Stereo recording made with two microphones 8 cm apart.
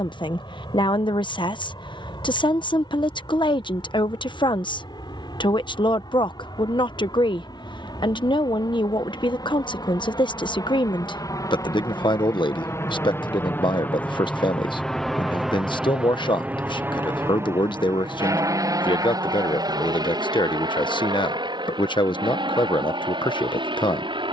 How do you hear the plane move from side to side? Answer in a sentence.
In this clip you hear the plane move from left to right.